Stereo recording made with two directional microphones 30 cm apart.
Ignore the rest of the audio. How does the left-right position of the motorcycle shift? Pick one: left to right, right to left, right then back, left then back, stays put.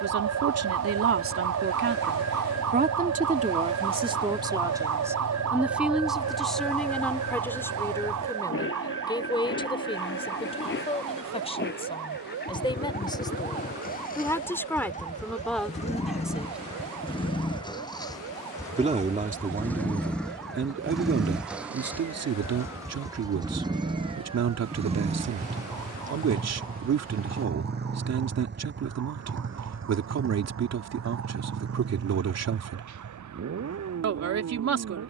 left to right.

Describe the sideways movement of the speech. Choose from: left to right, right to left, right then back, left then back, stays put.
left then back.